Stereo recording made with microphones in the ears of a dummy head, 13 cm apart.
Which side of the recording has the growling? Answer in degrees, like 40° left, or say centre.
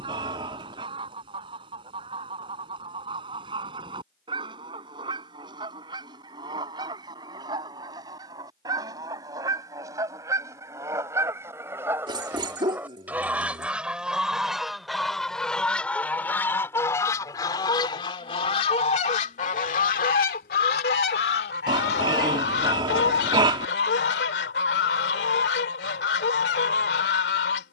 30° right.